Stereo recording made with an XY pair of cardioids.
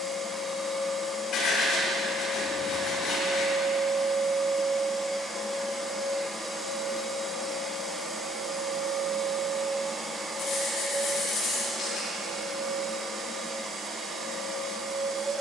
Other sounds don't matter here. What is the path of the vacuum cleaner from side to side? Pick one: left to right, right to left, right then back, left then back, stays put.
left to right.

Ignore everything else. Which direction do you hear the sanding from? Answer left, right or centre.
left.